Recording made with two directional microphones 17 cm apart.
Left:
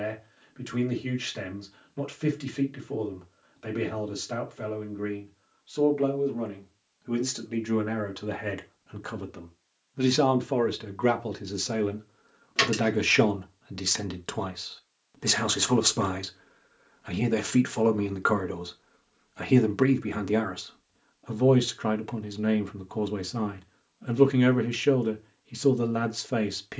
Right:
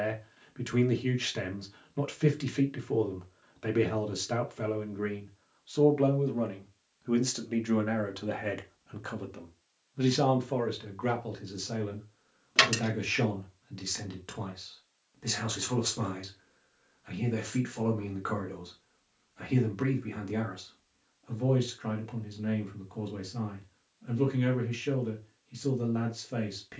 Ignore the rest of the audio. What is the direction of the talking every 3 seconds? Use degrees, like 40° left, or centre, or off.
20° right, 20° right, centre, 30° left, 50° left, 50° left, 50° left, 50° left, 50° left.